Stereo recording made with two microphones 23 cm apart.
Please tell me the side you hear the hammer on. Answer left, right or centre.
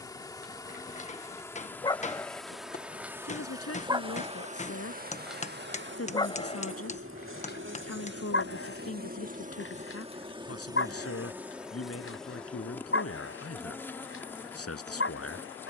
left.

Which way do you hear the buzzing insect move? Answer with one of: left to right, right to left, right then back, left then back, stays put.
right then back.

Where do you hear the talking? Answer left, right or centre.
left.